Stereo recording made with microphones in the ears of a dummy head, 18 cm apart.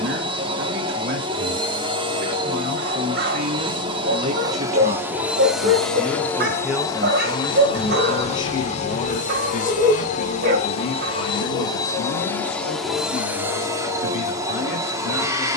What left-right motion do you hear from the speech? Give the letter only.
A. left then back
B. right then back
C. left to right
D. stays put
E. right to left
E.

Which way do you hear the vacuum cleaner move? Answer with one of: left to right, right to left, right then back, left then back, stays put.
left then back.